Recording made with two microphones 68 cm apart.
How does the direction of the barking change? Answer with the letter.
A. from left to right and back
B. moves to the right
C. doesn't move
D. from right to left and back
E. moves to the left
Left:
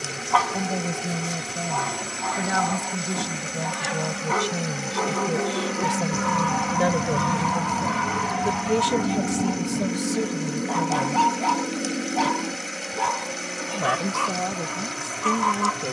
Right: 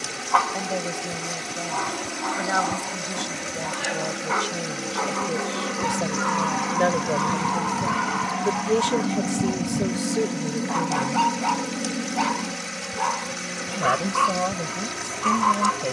C.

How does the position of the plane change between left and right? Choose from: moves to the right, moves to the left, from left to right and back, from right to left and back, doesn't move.
moves to the right.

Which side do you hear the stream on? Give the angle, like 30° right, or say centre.
30° right.